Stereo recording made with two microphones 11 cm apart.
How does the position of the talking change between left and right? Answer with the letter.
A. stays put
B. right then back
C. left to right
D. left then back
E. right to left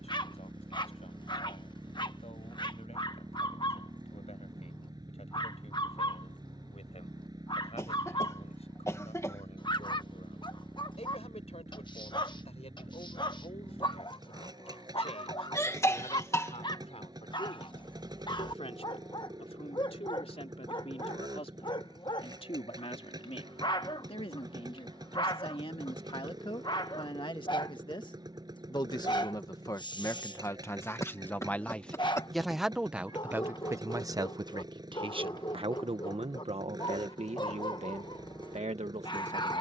C.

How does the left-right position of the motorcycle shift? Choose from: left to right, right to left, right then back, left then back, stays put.
stays put.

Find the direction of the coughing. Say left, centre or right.
left.